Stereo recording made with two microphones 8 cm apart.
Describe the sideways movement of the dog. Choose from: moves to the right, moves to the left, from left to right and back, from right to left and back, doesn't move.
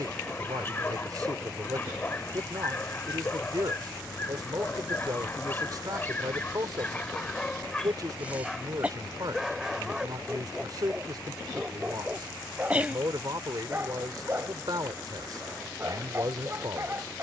moves to the right.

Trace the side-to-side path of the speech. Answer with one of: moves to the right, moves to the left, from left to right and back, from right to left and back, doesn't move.
doesn't move.